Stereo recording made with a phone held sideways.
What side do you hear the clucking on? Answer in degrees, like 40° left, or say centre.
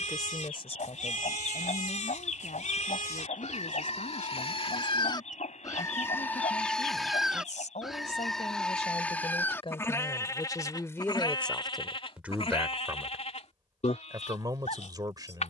60° left.